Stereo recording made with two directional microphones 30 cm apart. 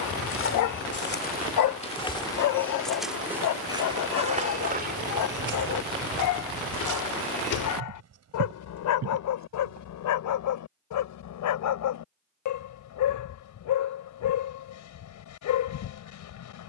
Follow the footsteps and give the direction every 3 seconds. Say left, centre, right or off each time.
left, right, right, right, off, off.